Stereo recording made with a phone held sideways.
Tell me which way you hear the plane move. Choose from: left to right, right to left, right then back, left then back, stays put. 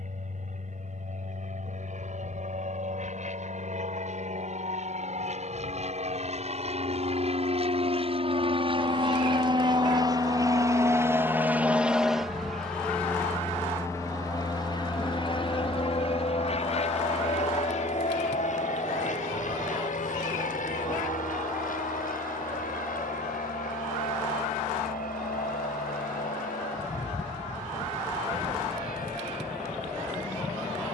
right to left.